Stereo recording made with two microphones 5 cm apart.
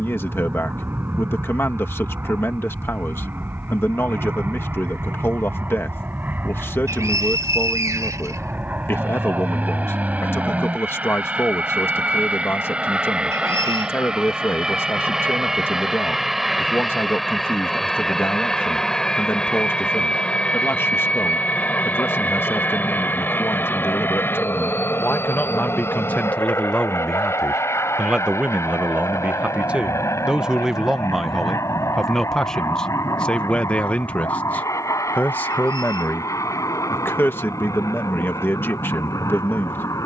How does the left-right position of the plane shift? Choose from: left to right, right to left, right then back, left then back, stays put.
right to left.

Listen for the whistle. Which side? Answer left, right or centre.
right.